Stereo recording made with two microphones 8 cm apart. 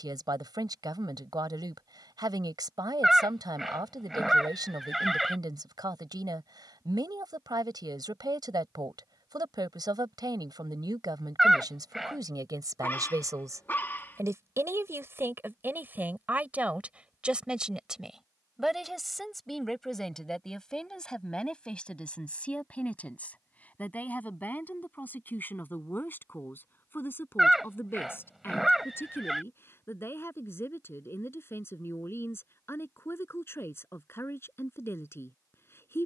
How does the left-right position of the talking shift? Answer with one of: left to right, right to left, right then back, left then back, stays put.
right to left.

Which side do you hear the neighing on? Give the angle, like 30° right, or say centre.
centre.